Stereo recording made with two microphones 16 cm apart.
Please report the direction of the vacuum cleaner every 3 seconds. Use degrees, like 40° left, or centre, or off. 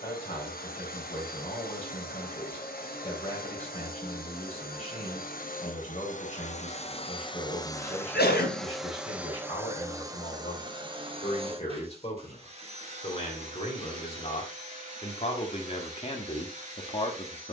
70° left, 60° left, 30° left, 20° right, 40° right, 50° right.